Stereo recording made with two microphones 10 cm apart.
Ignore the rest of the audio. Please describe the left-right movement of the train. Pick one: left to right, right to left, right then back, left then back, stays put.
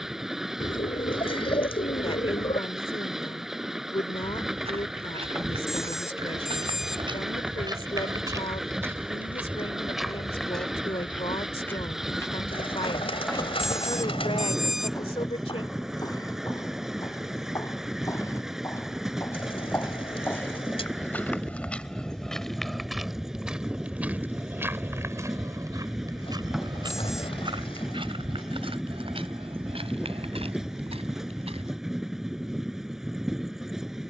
stays put.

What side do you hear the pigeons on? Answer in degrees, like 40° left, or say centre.
70° left.